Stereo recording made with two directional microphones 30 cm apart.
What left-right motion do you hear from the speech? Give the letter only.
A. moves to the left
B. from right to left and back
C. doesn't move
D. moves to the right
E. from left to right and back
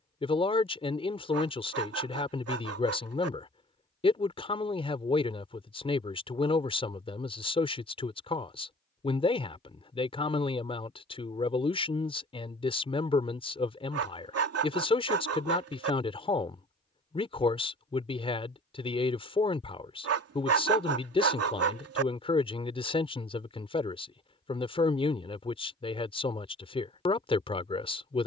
C.